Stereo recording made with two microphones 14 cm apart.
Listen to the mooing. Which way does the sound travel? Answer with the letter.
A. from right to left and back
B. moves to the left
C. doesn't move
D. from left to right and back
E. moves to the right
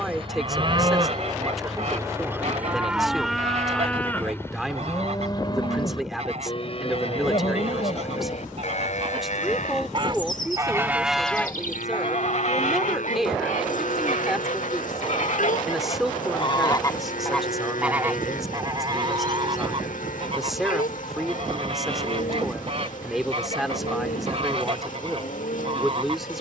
B.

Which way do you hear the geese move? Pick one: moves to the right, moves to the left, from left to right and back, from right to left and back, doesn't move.
from right to left and back.